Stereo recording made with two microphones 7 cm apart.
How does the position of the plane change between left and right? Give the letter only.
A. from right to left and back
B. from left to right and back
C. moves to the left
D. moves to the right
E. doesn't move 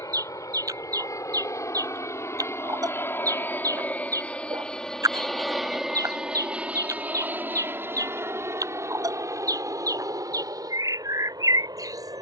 D.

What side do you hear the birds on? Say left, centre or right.
right.